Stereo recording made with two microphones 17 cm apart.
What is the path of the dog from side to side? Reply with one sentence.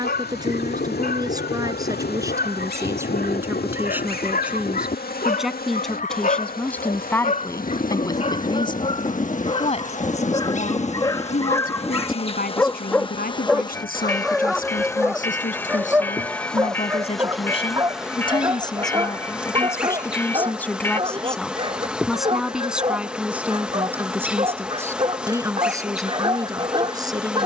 In this clip you hear the dog move from left to right.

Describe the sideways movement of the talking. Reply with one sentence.
You can hear the talking move from right to left and back again.